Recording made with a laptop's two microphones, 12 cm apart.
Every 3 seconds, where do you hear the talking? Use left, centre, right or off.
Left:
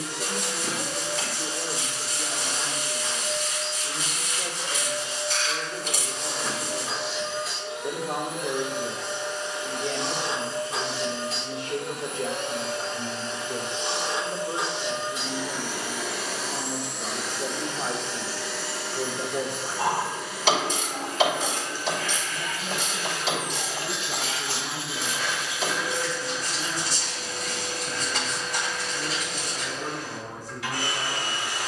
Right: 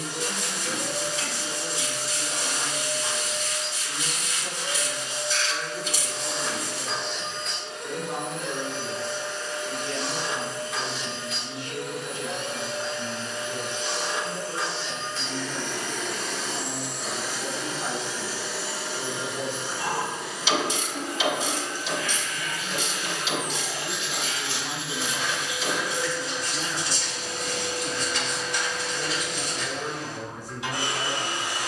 left, left, left, left, left, left, left, left, right, right, right.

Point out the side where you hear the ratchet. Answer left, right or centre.
left.